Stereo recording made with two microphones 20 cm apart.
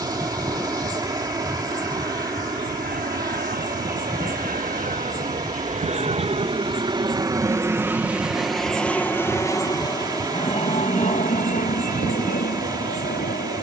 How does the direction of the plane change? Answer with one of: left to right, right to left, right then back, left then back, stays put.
right to left.